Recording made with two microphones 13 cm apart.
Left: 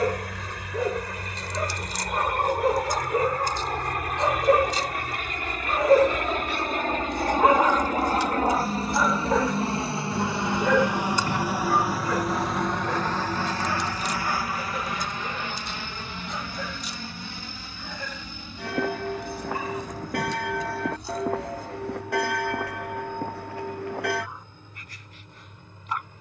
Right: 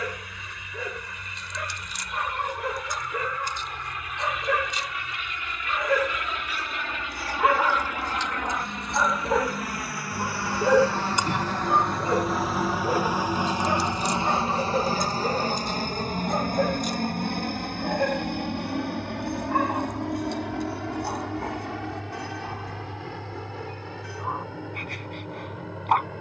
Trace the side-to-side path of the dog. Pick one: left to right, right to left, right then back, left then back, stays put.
left to right.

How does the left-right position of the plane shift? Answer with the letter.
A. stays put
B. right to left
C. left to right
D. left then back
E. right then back
C.